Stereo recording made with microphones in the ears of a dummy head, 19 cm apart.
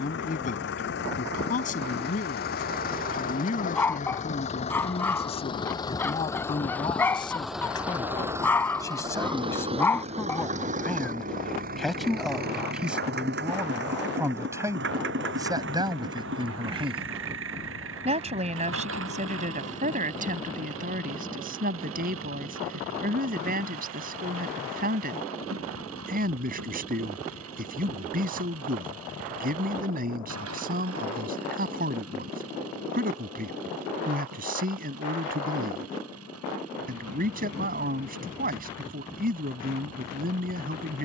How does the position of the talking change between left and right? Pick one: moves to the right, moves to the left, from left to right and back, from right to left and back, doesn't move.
moves to the right.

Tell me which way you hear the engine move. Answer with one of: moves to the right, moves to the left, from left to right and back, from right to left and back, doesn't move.
moves to the right.